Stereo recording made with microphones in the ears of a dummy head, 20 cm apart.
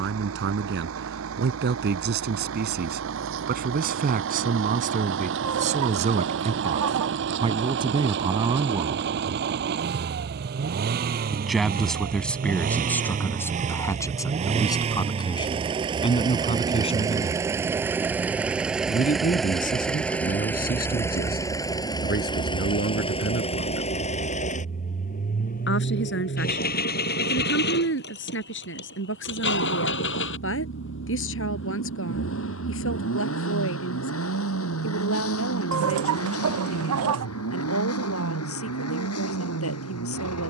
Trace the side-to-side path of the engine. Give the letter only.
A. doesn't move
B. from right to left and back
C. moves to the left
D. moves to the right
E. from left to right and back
C.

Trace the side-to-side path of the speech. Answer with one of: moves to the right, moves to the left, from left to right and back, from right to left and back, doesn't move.
moves to the left.